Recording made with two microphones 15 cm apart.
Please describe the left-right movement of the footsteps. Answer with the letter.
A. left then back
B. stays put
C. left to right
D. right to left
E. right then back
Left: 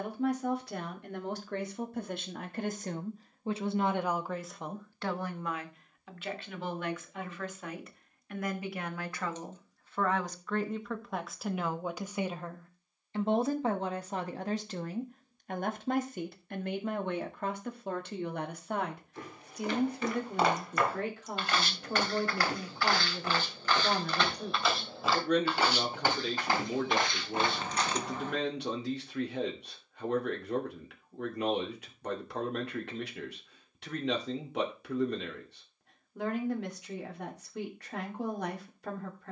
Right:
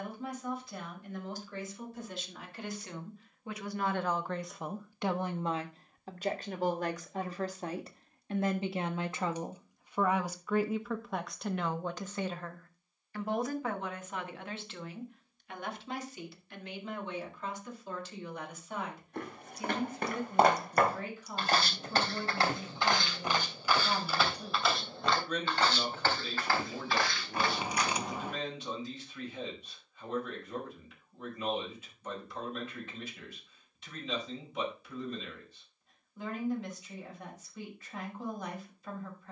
D.